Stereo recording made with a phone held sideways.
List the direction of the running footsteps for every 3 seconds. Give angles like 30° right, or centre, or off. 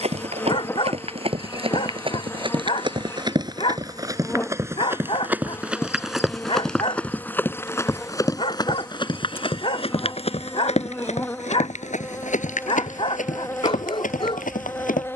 40° right, 20° right, 10° left, 50° left, 70° left.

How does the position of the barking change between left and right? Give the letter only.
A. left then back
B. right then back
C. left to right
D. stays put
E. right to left
D.